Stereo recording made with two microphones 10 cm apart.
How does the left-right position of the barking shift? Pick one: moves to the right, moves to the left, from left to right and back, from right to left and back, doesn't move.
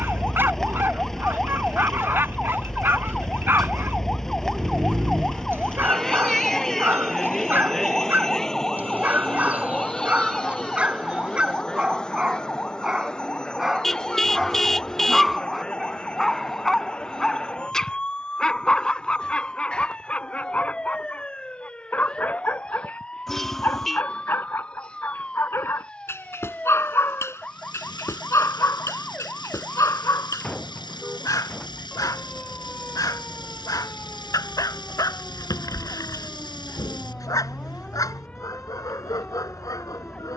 moves to the left.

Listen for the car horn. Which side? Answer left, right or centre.
centre.